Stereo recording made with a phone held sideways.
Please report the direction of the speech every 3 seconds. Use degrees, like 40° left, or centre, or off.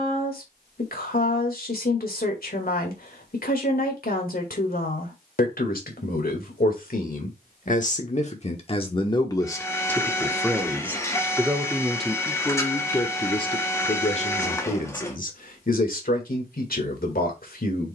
60° left, 60° left, 50° left, 10° left, 30° left, 60° left.